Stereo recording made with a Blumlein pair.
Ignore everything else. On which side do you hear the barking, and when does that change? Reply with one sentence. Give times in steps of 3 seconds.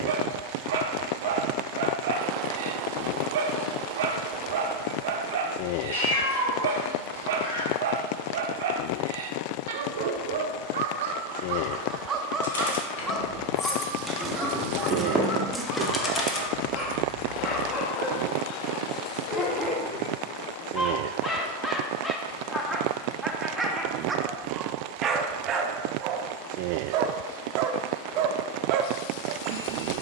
In this clip you hear the barking on the right from 0 s, in the centre from 12 s, on the left from 15 s, in the centre from 21 s and on the right from 24 s.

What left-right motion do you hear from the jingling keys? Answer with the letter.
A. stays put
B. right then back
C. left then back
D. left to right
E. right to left
B.